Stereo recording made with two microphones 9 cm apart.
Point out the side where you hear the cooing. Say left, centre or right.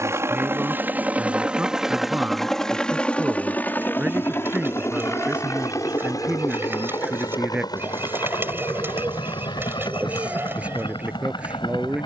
right.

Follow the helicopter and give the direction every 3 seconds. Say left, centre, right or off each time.
centre, left, left, left.